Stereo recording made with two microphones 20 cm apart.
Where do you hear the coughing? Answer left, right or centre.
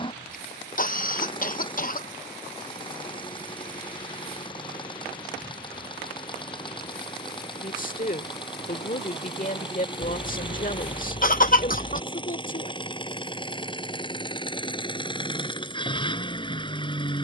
left.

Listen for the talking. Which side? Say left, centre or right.
left.